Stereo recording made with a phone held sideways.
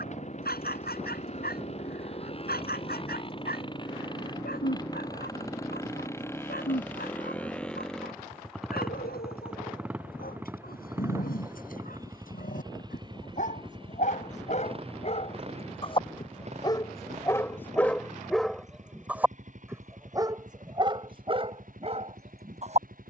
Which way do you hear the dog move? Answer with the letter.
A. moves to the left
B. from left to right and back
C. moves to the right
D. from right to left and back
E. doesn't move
C.